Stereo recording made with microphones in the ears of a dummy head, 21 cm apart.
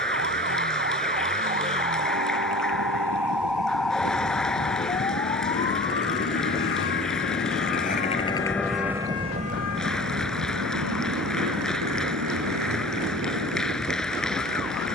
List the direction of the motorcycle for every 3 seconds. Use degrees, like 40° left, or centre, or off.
80° left, 70° left, 40° left, 50° right, 80° right.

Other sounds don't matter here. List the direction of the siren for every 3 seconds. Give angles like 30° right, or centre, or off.
30° right, 10° left, 40° left, 60° left, 70° left.